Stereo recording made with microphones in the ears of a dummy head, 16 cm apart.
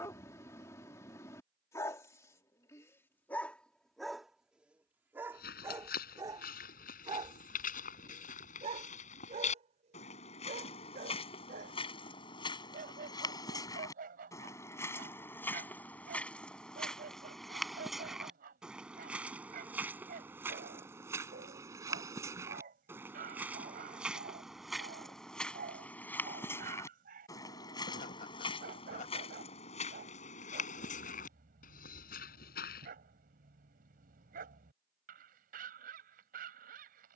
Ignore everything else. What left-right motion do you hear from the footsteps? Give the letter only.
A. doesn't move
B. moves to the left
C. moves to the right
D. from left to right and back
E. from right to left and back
D.